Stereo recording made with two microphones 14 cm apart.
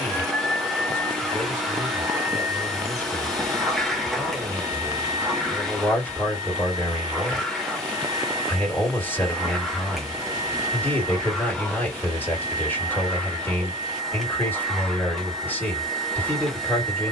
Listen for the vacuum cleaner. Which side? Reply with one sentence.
You can hear the vacuum cleaner in the centre.